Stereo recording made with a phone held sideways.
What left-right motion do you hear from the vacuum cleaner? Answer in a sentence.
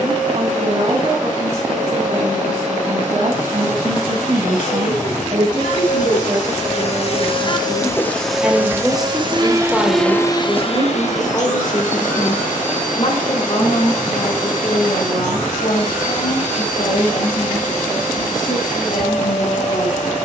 You can hear the vacuum cleaner go right and come back.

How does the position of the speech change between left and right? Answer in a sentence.
In this clip you hear the speech travel towards the left.